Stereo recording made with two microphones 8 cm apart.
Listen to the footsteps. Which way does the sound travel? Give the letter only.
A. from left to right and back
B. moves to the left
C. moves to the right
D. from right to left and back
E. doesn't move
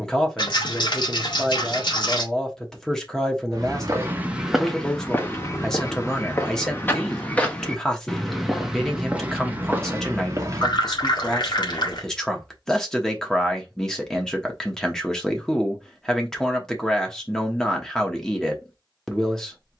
D.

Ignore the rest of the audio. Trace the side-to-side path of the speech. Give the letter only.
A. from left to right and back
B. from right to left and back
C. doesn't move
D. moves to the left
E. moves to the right
C.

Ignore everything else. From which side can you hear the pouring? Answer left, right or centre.
left.